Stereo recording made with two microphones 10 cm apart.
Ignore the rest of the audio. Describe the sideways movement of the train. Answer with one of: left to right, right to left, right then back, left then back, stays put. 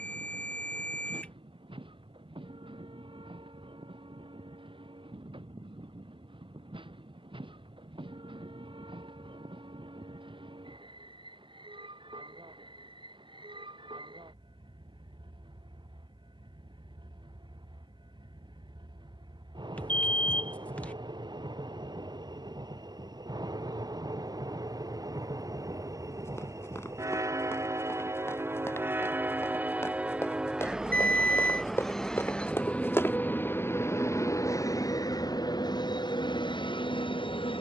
right to left.